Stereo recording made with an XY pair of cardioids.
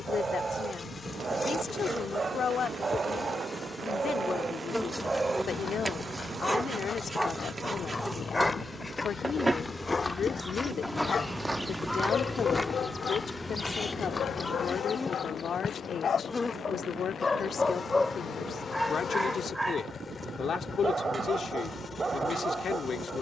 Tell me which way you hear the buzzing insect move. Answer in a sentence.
You can hear the buzzing insect move from left to right and back again.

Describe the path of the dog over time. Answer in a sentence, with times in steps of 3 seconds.
In this clip you hear the dog on the right from 0 s, in the centre from 6 s, on the left from 9 s, in the centre from 18 s and on the right from 21 s.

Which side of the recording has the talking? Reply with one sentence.
You can hear the talking on the left.